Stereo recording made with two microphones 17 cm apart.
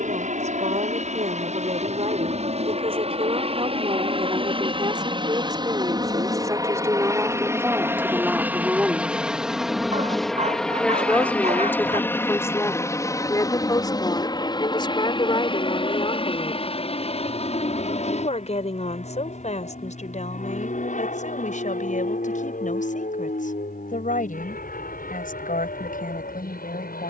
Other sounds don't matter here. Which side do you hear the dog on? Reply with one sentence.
You can hear the dog on the right.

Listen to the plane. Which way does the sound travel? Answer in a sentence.
In this clip you hear the plane go from the right side to the left.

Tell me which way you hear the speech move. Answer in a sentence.
You can hear the speech travel towards the left.